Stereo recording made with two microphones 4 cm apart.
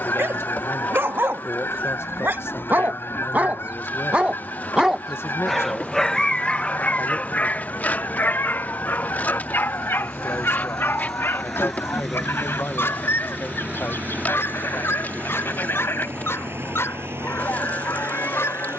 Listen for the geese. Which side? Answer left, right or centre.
left.